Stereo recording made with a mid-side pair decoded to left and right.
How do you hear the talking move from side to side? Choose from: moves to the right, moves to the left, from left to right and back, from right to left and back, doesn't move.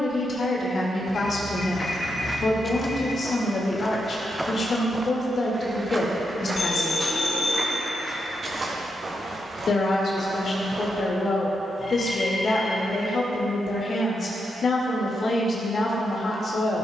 doesn't move.